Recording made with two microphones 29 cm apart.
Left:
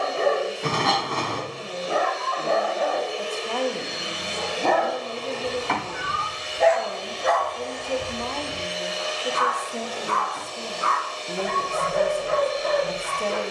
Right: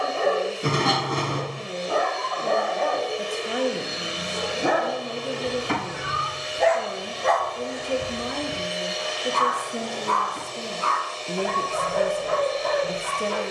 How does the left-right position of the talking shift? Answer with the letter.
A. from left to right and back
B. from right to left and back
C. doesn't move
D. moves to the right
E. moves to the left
C.